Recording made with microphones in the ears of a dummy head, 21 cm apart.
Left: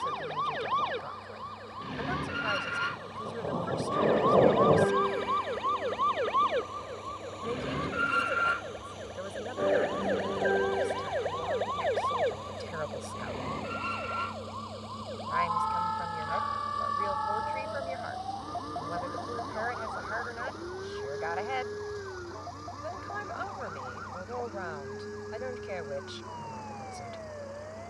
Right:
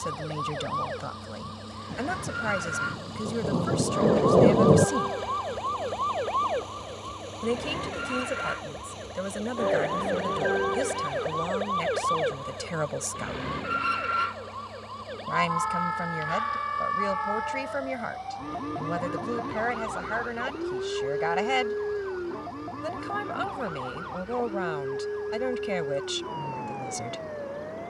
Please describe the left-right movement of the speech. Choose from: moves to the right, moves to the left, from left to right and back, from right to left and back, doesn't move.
doesn't move.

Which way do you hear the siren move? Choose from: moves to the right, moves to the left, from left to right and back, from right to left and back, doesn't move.
moves to the right.